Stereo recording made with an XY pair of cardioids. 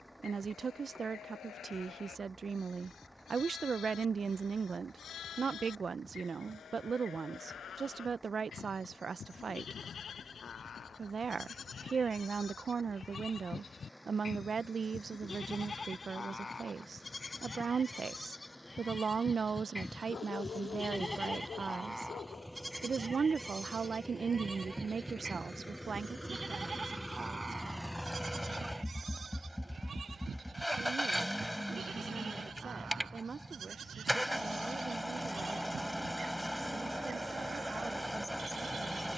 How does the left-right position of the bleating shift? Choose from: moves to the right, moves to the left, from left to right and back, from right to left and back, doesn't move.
moves to the right.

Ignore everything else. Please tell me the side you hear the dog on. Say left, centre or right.
left.